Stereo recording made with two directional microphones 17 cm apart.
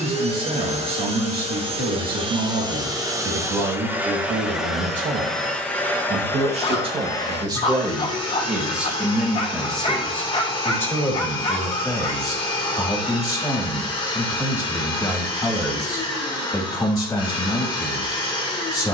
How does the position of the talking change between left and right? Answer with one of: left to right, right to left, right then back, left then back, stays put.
right to left.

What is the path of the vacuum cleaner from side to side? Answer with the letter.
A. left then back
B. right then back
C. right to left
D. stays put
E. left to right
C.